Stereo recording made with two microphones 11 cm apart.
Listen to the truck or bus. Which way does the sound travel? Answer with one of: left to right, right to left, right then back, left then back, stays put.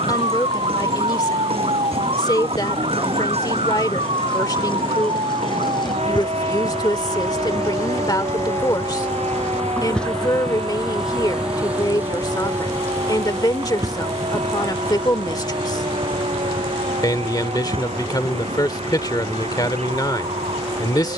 left to right.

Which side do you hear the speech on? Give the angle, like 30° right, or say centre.
40° left.